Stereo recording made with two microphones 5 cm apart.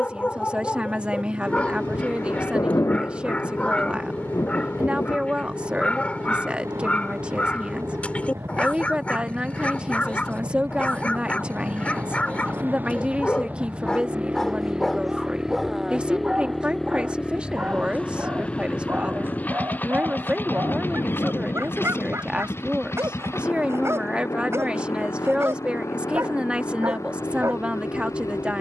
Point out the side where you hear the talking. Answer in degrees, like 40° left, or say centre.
20° right.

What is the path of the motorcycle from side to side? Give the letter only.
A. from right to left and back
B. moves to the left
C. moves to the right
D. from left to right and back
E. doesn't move
B.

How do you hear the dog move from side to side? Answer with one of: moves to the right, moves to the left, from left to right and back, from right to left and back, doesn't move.
moves to the right.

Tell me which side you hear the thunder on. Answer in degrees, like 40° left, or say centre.
60° left.